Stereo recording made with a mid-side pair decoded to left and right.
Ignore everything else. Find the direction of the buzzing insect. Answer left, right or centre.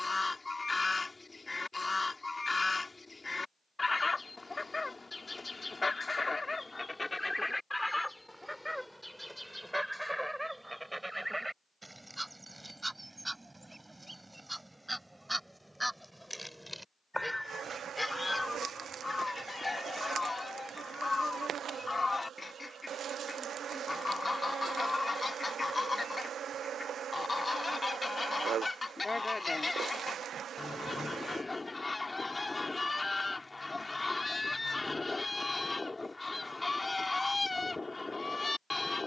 right.